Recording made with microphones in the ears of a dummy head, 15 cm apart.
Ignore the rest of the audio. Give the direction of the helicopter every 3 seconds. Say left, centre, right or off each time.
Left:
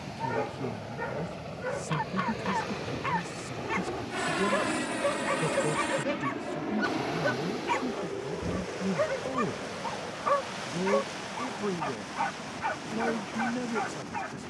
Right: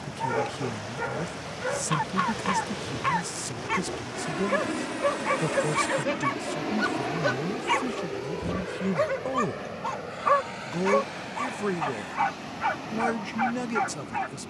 left, left, right, right, right.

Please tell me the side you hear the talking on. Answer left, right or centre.
right.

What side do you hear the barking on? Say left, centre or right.
right.